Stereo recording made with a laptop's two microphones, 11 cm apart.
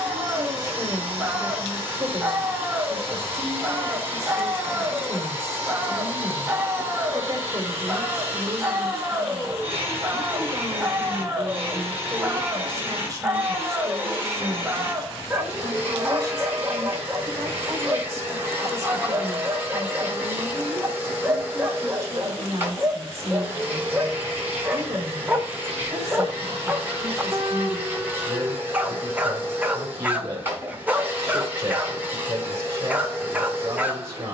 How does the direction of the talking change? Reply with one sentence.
You can hear the talking stay put.